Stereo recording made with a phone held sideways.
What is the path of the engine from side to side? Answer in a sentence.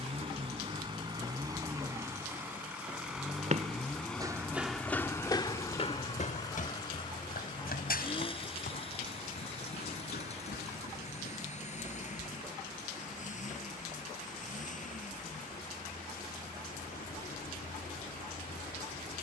In this clip you hear the engine move to the left.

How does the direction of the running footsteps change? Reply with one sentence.
You can hear the running footsteps travel towards the left.